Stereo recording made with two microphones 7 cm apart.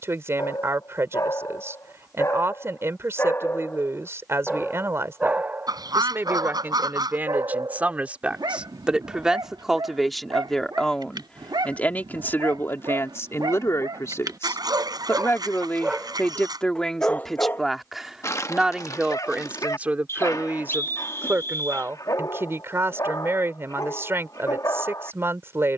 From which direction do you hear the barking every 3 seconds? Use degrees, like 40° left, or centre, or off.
50° left, centre, 60° right, 80° right, 60° right, centre, 50° left, 50° left, 50° left.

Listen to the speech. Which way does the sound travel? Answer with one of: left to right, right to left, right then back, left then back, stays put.
left then back.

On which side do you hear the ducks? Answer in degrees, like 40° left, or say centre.
60° right.